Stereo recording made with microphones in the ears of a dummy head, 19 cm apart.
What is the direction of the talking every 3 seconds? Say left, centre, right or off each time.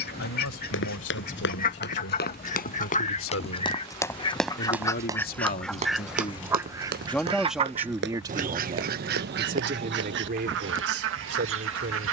left, left, centre, right.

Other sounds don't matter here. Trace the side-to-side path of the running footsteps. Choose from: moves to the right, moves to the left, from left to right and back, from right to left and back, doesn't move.
moves to the right.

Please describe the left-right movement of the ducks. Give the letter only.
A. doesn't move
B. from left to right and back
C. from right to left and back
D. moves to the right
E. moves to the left
D.